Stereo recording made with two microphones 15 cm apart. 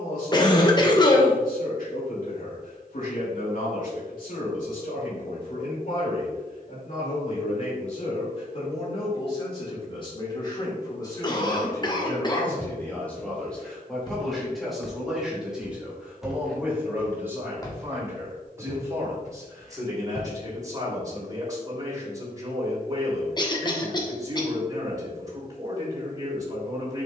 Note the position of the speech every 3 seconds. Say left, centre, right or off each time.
left, left, left, left, centre, centre, right, right, right.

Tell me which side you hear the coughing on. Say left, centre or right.
left.